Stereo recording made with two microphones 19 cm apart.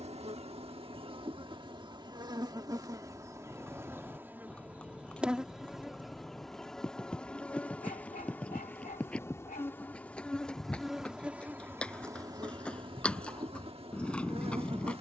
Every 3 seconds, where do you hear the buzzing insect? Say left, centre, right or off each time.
right, centre, centre, centre, right.